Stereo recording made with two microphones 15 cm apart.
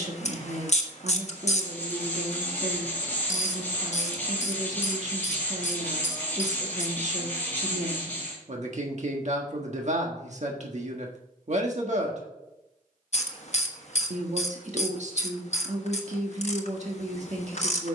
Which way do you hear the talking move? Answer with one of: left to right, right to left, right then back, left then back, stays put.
stays put.